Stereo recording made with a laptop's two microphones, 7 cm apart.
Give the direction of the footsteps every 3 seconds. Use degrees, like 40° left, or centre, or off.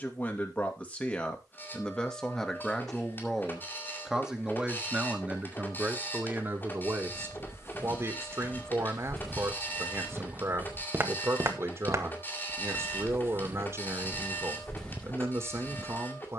off, off, 30° left, 20° right, 20° right, 30° left.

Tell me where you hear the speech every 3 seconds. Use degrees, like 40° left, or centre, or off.
10° left, 10° right, 40° right, 40° right, 40° right, 40° right.